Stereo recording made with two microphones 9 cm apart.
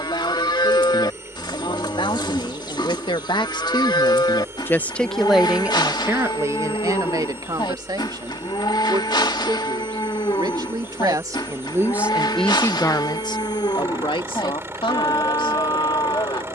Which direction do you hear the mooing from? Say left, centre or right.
left.